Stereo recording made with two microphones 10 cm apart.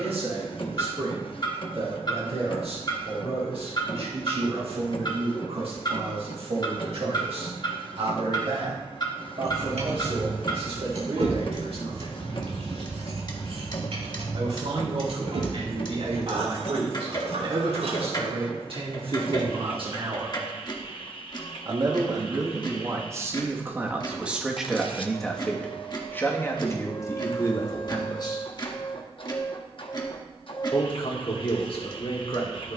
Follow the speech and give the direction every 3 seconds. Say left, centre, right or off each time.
right, right, right, right, right, right, right, right, centre, left, left.